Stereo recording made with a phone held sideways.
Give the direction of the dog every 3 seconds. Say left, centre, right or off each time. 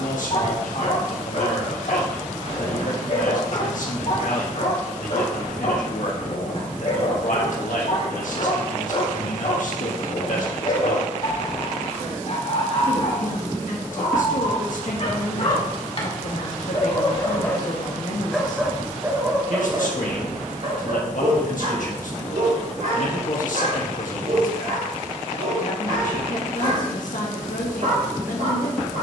left, left, left, left, left, left, right, right, right, right.